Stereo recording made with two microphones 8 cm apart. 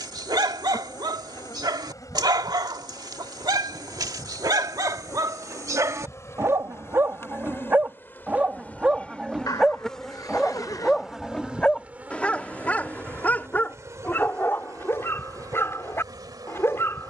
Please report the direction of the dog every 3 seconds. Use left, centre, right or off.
right, right, right, centre, left, left.